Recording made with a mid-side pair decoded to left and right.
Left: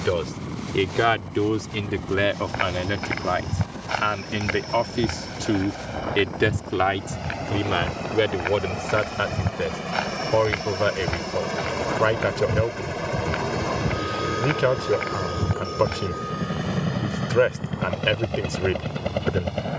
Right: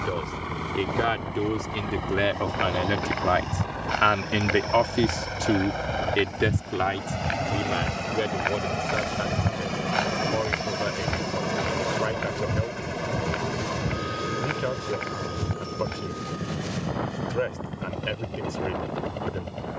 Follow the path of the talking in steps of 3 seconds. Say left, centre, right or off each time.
left, centre, left, left, left, left, left.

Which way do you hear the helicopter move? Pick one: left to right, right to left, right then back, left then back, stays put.
right to left.